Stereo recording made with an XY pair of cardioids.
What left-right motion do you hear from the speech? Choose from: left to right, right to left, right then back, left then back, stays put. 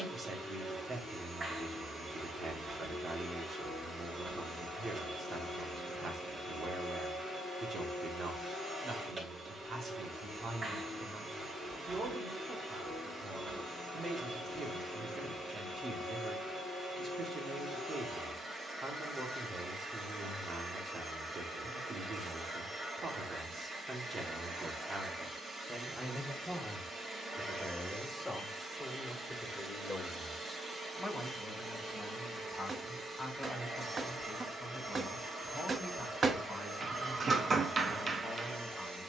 right to left.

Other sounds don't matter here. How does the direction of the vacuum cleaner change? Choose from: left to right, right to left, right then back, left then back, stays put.
stays put.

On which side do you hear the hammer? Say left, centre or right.
right.